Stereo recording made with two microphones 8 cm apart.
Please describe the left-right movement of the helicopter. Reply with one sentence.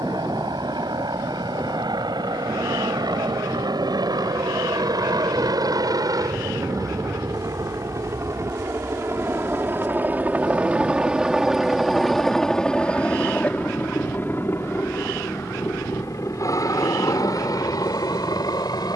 You can hear the helicopter move to the left.